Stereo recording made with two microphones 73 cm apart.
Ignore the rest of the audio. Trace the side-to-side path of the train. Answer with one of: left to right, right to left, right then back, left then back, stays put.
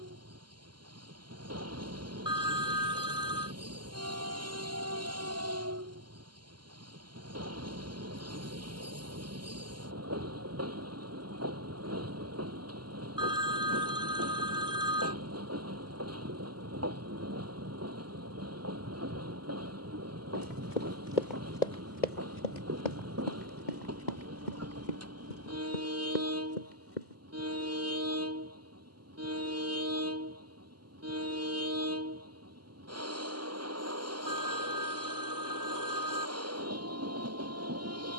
stays put.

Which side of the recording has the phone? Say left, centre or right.
centre.